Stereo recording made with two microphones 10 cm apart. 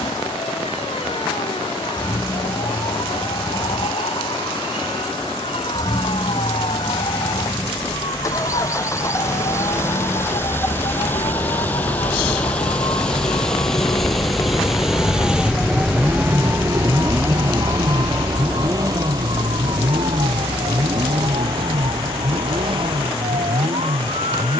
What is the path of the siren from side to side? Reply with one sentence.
In this clip you hear the siren travel towards the right.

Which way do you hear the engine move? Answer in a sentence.
In this clip you hear the engine move to the right.